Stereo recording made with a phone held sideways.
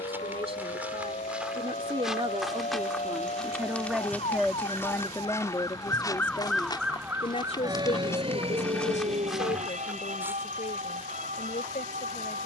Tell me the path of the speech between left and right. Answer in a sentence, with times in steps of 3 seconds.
You can hear the speech on the right from 0 s, in the centre from 3 s and on the left from 6 s.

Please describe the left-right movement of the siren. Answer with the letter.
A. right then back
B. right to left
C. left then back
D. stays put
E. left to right
E.